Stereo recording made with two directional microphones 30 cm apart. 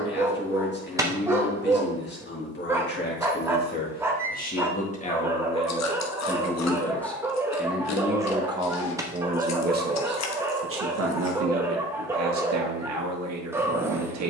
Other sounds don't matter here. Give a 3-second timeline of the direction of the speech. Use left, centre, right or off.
left, left, centre, right, right.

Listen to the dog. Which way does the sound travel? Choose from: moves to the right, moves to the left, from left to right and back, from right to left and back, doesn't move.
doesn't move.